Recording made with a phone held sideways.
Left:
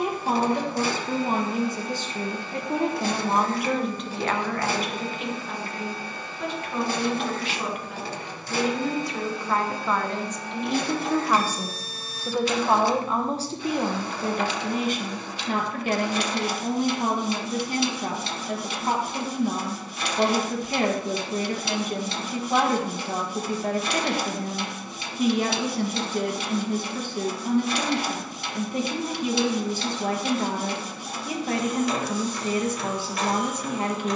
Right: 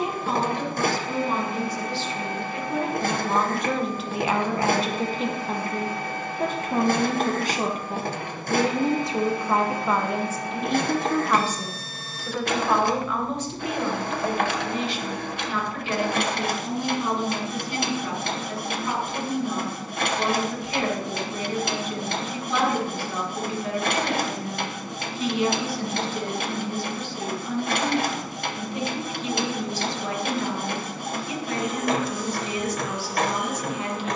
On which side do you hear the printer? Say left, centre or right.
right.